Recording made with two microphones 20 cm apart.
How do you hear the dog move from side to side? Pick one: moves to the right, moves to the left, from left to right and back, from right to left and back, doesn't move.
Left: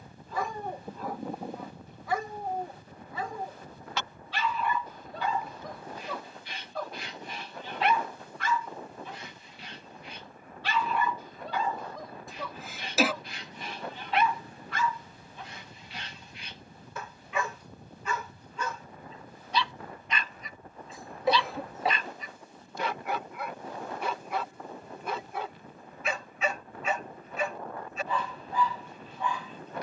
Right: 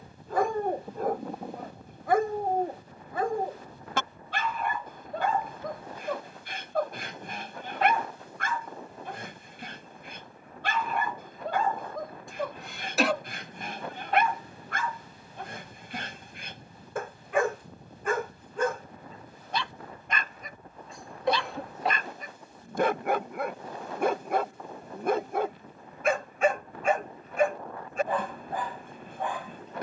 doesn't move.